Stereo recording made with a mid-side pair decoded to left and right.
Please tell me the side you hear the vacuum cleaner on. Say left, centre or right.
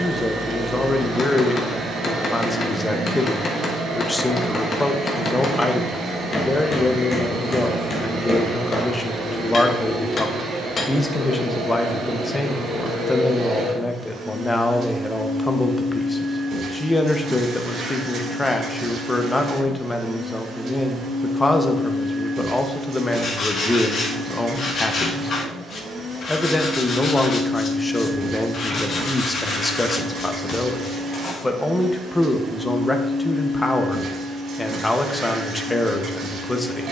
right.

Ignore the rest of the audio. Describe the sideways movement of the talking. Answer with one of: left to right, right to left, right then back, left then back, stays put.
stays put.